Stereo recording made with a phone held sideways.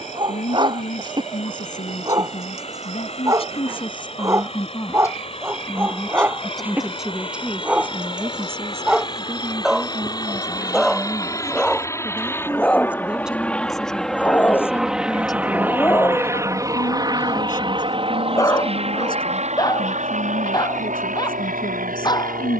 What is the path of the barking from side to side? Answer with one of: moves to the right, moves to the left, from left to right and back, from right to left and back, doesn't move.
moves to the left.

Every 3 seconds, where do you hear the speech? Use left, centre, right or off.
left, left, centre, right, centre, left, left, left.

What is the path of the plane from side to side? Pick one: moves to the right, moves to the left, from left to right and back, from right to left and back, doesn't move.
moves to the right.